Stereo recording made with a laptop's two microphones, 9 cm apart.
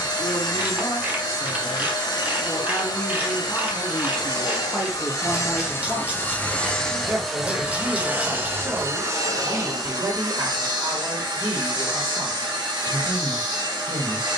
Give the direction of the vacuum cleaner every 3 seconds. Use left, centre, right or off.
left, left, centre, right, right.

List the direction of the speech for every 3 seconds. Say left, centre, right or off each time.
left, centre, right, right, right.